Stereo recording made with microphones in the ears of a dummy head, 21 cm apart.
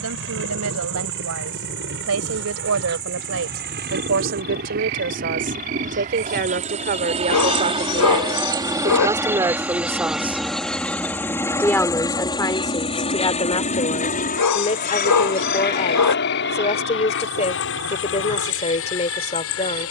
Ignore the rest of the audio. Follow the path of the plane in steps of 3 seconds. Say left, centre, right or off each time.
right, right, right, centre, left, left, left.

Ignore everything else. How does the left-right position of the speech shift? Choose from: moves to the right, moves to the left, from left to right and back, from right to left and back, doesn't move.
moves to the left.